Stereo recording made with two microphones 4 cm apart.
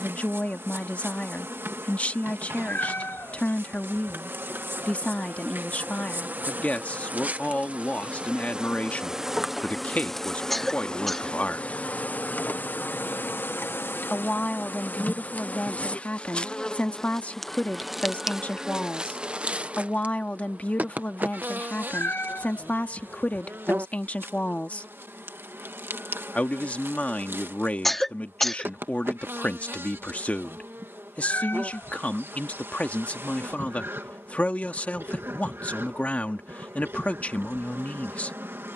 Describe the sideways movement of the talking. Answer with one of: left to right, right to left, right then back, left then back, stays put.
stays put.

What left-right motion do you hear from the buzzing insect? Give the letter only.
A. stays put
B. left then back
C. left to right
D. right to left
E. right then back
B.